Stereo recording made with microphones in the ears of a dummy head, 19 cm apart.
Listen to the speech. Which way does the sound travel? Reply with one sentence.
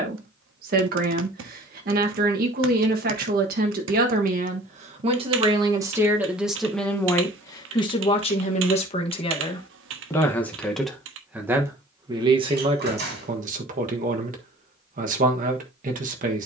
You can hear the speech go left and come back.